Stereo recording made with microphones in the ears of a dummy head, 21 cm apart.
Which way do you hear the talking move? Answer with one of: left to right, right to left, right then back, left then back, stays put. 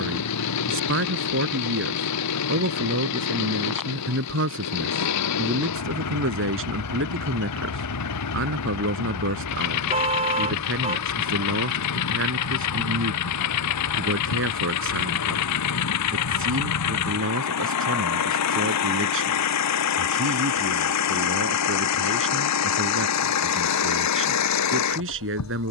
stays put.